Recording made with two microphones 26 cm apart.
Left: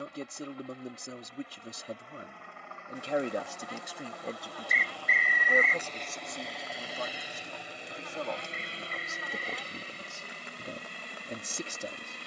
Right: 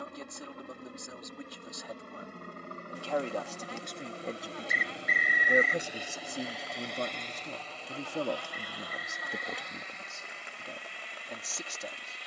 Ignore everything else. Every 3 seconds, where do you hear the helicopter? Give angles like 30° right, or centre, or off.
60° right, 30° right, 10° left, 40° left.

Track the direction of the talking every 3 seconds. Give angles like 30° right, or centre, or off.
30° left, centre, 40° right, 20° left.